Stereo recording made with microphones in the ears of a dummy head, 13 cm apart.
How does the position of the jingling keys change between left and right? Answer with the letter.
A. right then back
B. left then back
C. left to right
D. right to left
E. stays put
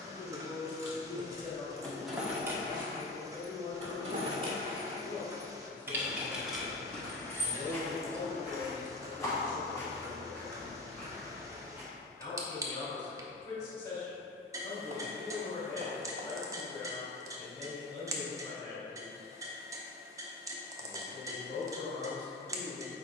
A.